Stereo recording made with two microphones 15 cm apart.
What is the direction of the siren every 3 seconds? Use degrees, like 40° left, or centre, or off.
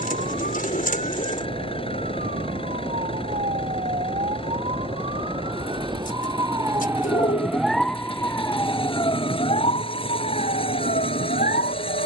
60° right, 50° right, centre, 50° left.